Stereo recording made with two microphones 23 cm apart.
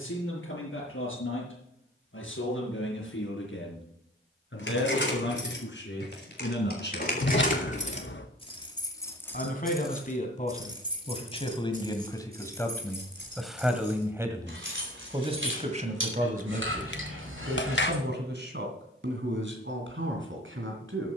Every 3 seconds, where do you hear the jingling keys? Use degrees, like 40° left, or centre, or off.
off, 60° left, 40° left, 10° right, 50° right, 70° right, off.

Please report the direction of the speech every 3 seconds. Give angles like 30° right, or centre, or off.
70° left, 60° left, 50° left, 30° left, centre, 40° right, 60° right.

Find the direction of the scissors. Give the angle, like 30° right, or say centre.
60° left.